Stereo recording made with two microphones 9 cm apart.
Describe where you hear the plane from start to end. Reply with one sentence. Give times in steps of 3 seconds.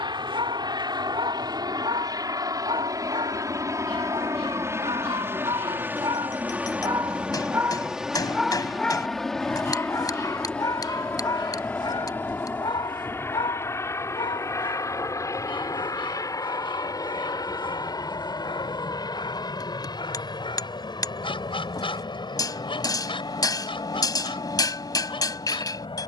You can hear the plane on the right from 0 s, in the centre from 6 s and on the left from 12 s.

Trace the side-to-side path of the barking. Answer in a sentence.
In this clip you hear the barking go from the right side to the left.